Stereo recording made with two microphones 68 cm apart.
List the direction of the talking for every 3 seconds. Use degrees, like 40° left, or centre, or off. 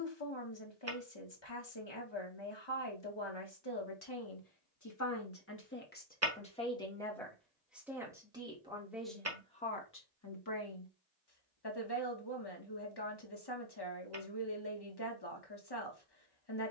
40° left, 30° left, centre, 20° left, 40° left, 40° left.